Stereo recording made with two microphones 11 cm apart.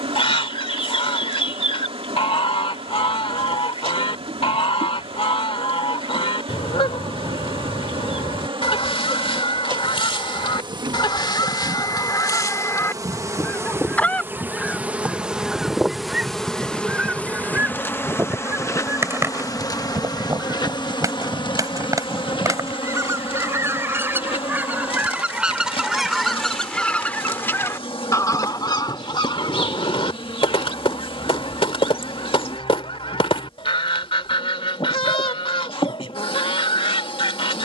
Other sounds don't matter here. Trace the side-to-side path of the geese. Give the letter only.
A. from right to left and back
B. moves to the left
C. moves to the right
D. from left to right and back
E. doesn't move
D.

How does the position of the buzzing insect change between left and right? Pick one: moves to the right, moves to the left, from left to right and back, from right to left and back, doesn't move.
moves to the left.